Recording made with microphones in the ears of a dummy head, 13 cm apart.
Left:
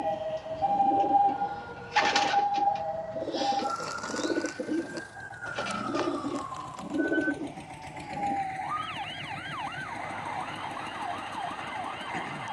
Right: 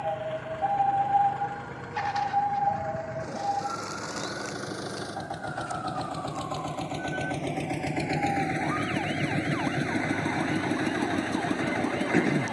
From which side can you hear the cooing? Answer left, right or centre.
left.